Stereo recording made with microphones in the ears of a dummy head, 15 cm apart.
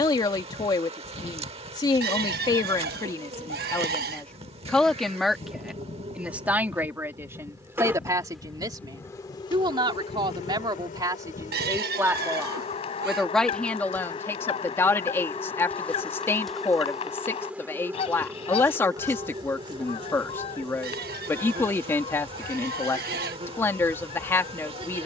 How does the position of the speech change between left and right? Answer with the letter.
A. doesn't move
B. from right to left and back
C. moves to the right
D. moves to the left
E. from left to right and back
E.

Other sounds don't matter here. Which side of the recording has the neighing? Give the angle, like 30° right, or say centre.
60° right.